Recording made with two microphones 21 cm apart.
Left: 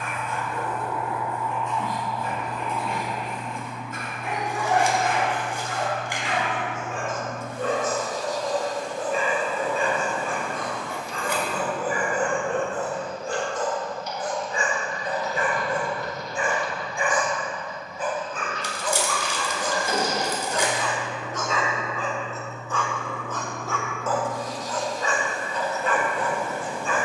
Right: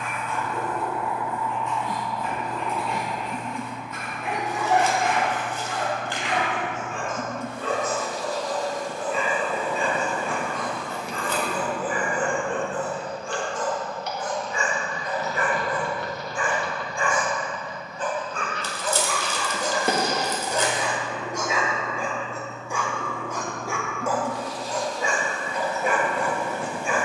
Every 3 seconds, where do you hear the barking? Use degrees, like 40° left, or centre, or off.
50° left, 50° left, 50° left, 50° left, 40° left, 20° left, 10° right, 10° right, 10° right.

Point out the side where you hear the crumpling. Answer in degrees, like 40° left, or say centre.
10° left.